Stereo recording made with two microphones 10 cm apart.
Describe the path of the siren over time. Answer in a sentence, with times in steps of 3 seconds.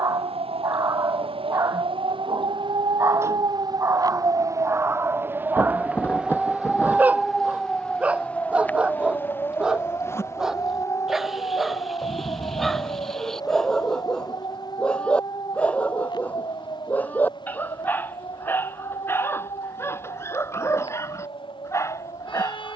You can hear the siren on the right from 0 s, in the centre from 6 s and on the left from 9 s.